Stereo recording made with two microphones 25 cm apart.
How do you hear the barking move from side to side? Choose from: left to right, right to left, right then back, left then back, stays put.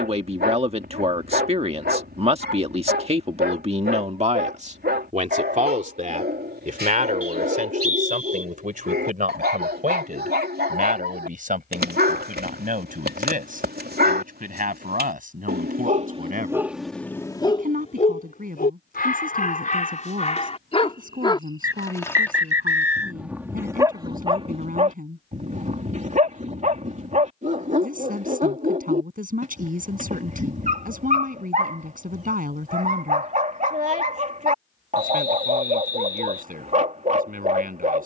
left then back.